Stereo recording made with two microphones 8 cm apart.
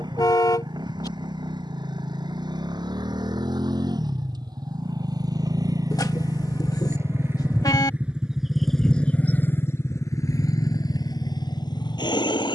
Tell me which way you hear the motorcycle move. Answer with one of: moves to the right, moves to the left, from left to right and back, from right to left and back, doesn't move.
moves to the left.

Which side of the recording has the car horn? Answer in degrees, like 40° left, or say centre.
50° left.